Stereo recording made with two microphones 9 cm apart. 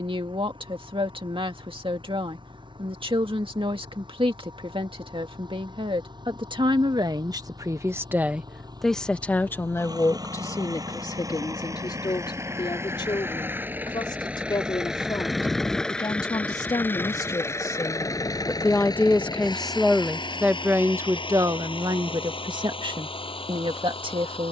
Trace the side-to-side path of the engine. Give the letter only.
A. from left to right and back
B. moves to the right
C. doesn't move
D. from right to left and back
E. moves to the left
E.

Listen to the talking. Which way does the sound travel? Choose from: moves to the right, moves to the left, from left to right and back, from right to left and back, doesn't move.
from right to left and back.